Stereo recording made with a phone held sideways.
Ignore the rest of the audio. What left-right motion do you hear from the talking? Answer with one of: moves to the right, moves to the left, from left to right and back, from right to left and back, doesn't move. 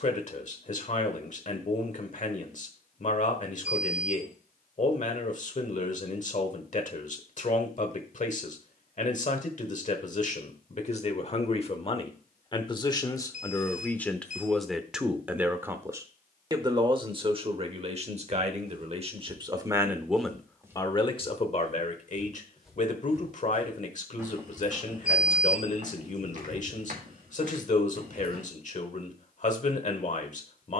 from left to right and back.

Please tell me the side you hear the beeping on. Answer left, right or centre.
left.